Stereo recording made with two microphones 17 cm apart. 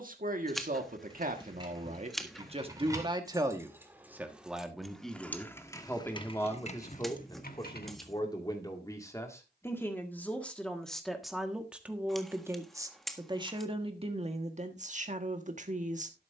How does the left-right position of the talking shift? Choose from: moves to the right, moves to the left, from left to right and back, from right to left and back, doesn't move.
from right to left and back.